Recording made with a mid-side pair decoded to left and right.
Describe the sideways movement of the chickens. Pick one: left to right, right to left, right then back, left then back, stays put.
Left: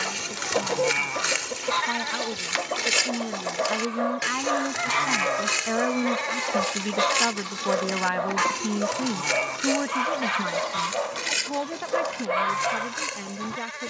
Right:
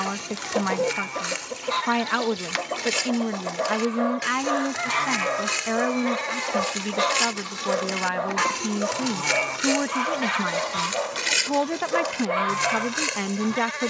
stays put.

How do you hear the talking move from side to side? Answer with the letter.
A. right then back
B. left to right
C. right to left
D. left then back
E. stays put
D.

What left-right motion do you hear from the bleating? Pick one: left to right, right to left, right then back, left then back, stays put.
left to right.